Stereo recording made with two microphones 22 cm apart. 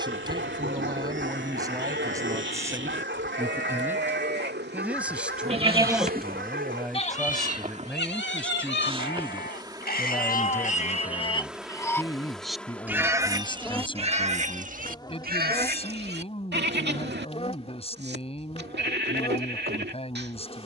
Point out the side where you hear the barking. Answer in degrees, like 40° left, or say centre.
60° right.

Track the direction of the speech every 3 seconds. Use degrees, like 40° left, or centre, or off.
20° right, 10° right, centre, 10° left, 20° left, 30° left, 30° left.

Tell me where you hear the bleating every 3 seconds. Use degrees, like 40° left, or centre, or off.
60° right, 50° right, 40° left, 40° left, 20° right, 50° right, 50° right.